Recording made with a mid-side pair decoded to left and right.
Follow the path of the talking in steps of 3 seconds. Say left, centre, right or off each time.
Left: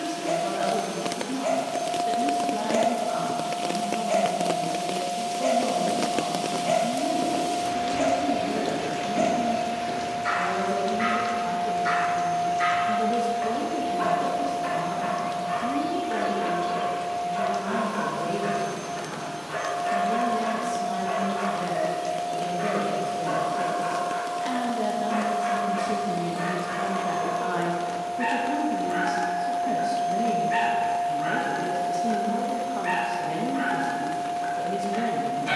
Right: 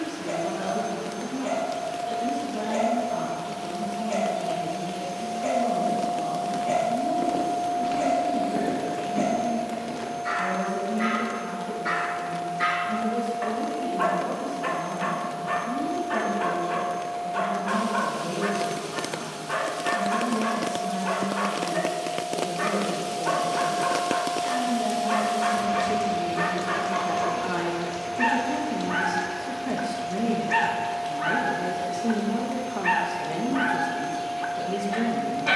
left, left, left, left, left, left, left, left, left, centre, centre, centre.